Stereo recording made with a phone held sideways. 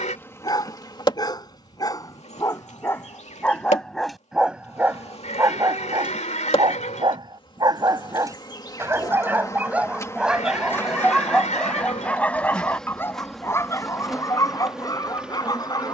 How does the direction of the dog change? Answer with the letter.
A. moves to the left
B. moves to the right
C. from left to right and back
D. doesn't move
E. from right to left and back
C.